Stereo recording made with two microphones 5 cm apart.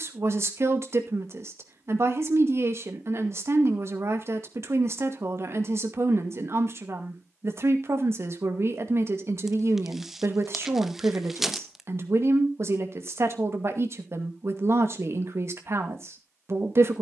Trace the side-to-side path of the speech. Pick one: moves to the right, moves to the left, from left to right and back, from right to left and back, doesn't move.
doesn't move.